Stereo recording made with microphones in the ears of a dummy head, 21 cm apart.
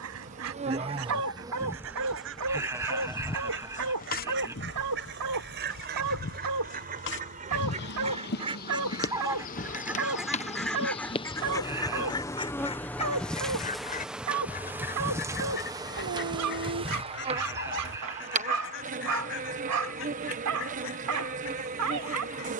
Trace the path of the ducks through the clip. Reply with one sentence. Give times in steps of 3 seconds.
In this clip you hear the ducks on the right from 0 s, in the centre from 9 s and on the left from 12 s.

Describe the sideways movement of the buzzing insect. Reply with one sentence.
You can hear the buzzing insect move from right to left and back again.